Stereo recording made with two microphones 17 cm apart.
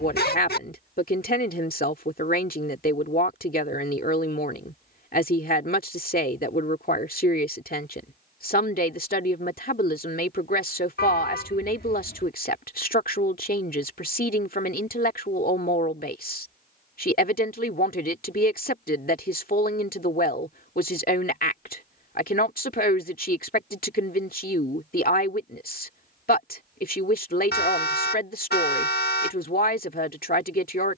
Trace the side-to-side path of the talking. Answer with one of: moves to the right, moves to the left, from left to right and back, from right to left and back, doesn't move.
doesn't move.